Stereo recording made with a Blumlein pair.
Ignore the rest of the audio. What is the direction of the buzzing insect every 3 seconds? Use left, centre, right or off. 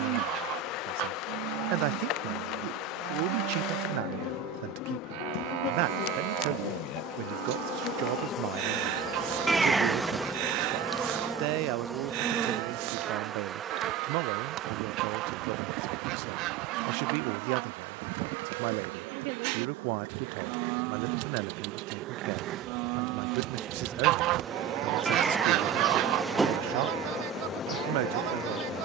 left, left, left, centre, right, right, right, right, centre, left.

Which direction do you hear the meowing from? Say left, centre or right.
centre.